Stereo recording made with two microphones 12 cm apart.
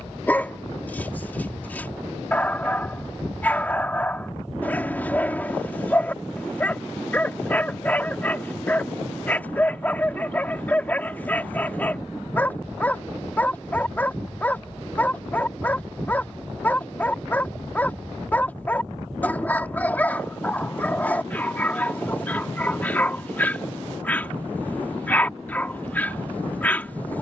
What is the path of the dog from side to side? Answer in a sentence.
In this clip you hear the dog stay put.